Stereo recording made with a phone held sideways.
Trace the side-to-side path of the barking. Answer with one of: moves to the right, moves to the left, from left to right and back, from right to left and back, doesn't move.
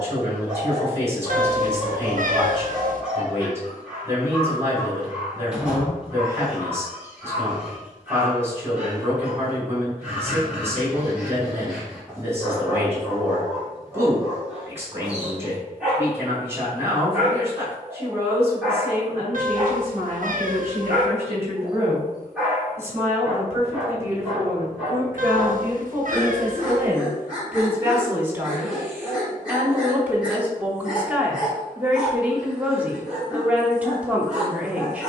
doesn't move.